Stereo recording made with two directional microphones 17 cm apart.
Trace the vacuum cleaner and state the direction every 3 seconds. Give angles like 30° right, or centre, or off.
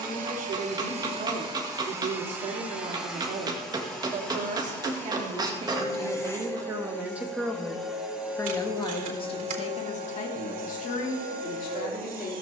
30° right, 10° left, centre, 50° right.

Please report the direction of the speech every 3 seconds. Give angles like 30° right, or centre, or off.
50° right, 40° right, centre, 50° left.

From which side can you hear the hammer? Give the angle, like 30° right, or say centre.
20° right.